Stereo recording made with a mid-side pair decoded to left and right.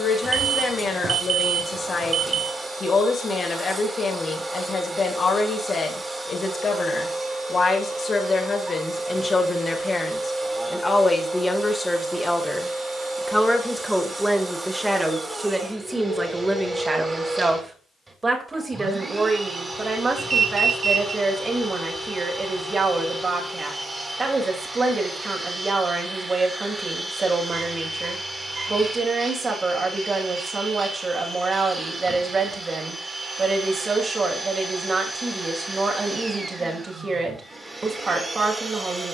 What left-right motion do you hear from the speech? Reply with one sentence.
In this clip you hear the speech move to the right.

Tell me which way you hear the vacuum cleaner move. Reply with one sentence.
You can hear the vacuum cleaner stay in one place.